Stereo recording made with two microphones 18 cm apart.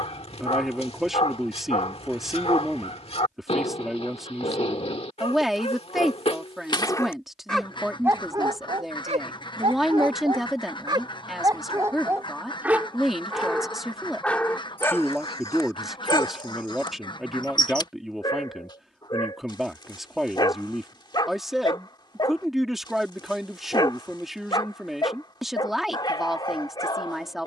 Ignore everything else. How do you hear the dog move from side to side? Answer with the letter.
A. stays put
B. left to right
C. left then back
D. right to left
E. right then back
E.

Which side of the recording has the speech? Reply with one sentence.
You can hear the speech in the centre.